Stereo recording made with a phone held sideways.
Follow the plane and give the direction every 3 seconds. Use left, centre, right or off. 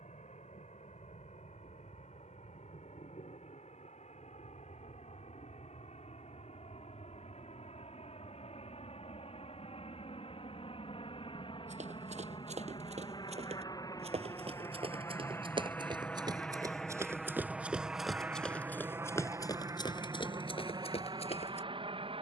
left, left, left, left, left, centre, right, right.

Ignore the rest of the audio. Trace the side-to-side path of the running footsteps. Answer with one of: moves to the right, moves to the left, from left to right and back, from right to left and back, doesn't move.
moves to the left.